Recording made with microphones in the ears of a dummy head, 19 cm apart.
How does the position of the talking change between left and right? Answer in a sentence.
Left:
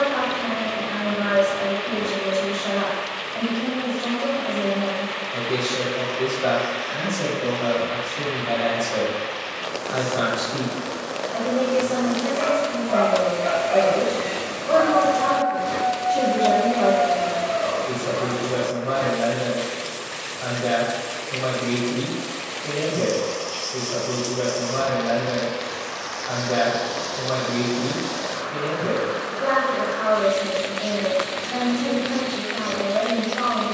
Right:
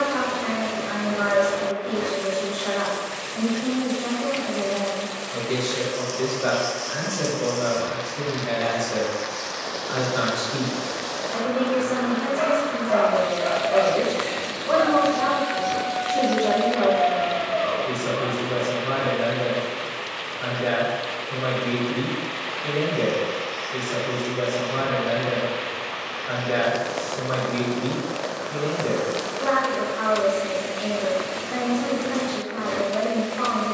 In this clip you hear the talking stay in one place.